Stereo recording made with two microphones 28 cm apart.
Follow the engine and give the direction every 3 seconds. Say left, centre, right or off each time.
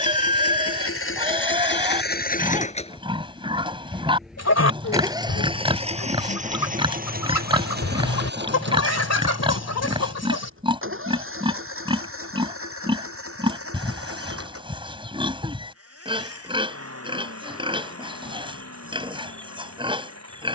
left, centre, right, right, right, right, right.